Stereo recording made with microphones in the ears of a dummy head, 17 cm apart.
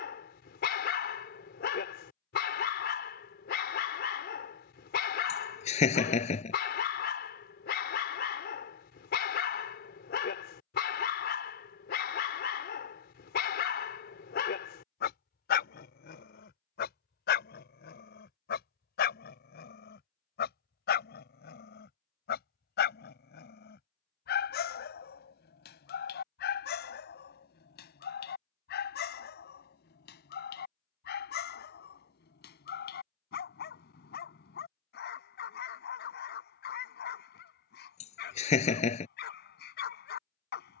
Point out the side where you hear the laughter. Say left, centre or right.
left.